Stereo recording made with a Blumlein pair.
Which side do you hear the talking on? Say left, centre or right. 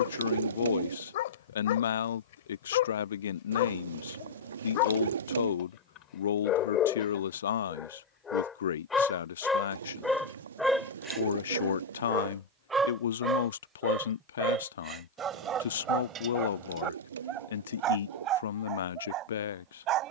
left.